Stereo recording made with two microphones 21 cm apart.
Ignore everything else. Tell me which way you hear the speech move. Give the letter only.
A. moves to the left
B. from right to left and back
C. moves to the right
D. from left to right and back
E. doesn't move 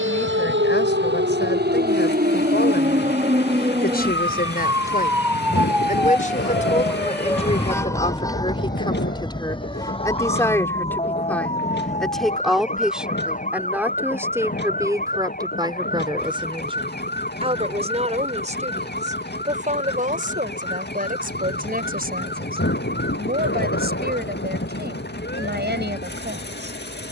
C.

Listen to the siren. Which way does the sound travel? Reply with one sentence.
You can hear the siren travel towards the left.